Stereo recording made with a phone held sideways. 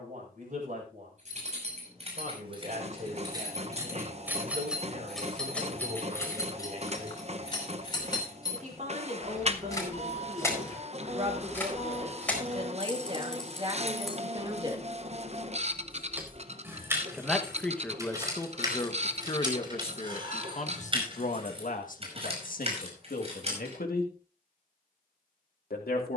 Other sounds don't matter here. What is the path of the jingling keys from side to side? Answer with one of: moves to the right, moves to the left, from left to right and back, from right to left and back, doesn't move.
from right to left and back.